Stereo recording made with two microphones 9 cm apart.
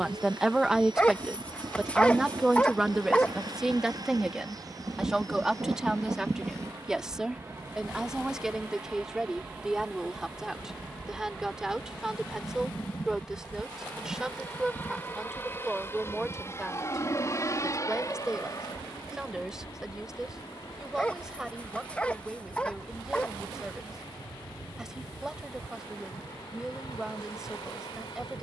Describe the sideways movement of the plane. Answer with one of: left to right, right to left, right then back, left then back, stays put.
right to left.